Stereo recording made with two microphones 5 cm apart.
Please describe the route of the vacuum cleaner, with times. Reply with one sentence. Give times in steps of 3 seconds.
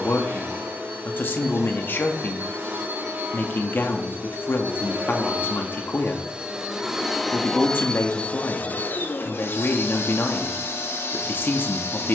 In this clip you hear the vacuum cleaner on the right from 0 s, in the centre from 6 s and on the left from 9 s.